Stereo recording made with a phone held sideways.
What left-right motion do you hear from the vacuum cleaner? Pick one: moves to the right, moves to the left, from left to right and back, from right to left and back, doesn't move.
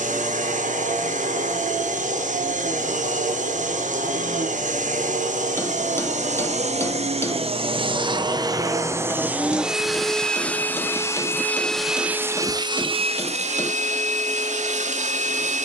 from right to left and back.